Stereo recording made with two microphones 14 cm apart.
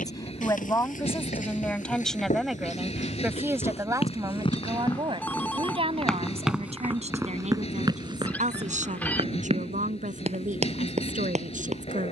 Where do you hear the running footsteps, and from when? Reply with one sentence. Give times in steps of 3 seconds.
You can hear the running footsteps on the left from 0 s and on the right from 6 s.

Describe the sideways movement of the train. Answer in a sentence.
You can hear the train stay put.